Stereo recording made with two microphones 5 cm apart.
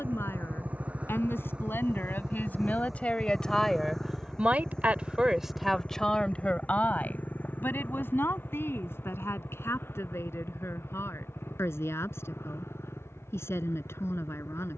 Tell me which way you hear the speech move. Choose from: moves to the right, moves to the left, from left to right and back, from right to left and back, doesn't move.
from left to right and back.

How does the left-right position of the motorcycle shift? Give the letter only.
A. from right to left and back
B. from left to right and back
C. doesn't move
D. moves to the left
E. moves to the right
D.